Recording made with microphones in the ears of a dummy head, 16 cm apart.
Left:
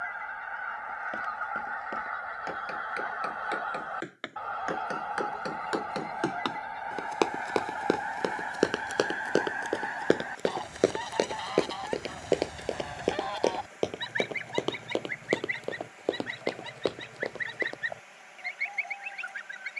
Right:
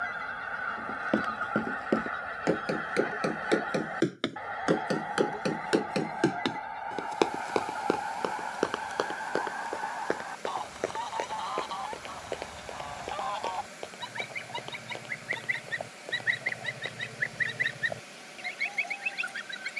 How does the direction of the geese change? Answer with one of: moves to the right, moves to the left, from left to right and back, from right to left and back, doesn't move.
from right to left and back.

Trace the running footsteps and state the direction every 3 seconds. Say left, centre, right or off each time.
right, right, centre, left, left, left, off.